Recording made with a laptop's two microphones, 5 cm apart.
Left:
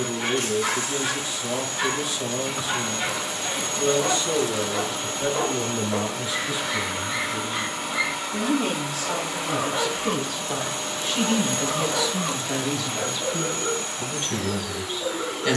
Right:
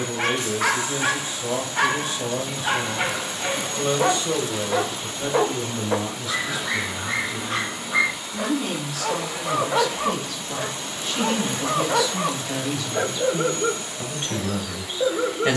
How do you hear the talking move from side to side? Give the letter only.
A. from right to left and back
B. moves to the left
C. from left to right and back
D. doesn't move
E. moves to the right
A.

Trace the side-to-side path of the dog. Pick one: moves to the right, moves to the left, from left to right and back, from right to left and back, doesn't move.
doesn't move.